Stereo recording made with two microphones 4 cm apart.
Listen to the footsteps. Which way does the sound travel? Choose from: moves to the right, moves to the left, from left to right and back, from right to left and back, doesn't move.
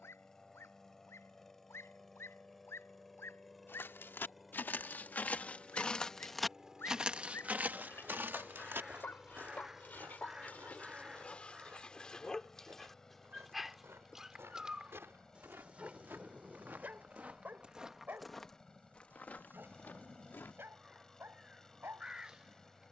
from left to right and back.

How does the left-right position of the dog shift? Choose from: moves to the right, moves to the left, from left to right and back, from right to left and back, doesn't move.
moves to the right.